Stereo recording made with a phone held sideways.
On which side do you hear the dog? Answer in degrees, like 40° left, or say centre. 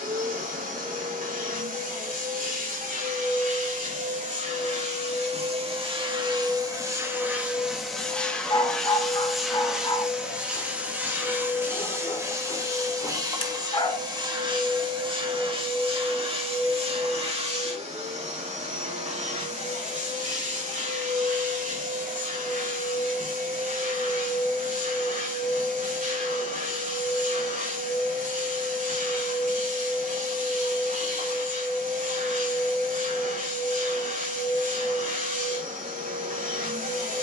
30° left.